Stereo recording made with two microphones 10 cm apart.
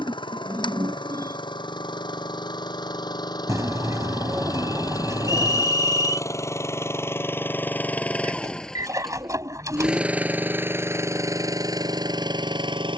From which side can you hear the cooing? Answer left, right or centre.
right.